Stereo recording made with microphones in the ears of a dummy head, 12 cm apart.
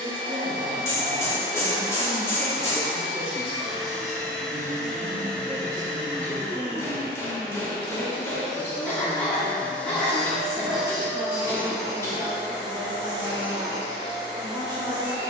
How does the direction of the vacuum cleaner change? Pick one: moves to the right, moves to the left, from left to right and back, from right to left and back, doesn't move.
from right to left and back.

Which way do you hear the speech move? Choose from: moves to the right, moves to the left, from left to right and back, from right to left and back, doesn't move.
from right to left and back.